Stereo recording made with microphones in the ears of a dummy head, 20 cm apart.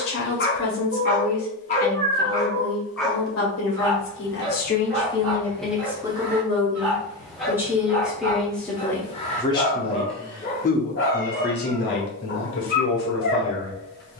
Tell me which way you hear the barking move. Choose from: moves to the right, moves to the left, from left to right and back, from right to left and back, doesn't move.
from left to right and back.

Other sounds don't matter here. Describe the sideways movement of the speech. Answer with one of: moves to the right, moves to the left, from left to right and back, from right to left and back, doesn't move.
from left to right and back.